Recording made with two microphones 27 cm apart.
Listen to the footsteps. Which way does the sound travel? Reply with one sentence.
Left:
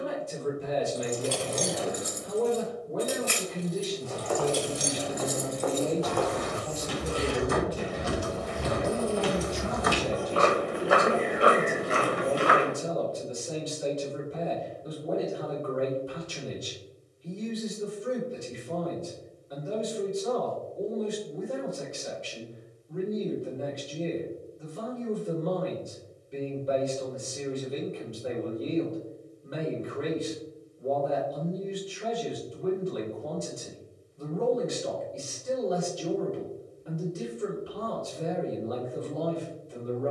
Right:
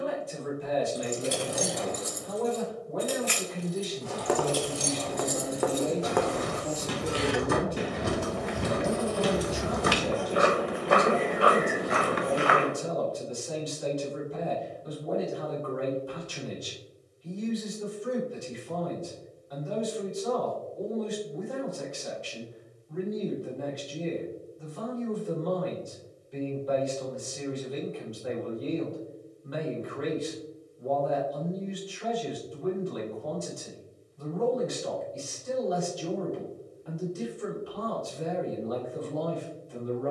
In this clip you hear the footsteps go from the right side to the left.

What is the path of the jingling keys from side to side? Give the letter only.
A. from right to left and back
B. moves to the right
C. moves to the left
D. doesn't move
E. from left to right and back
A.